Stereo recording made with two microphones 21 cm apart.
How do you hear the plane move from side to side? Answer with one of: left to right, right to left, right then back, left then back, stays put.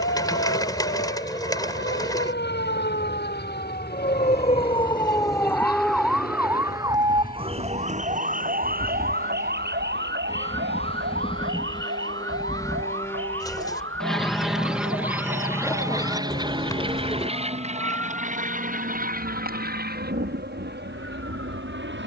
left to right.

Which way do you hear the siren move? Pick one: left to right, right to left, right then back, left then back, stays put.
left to right.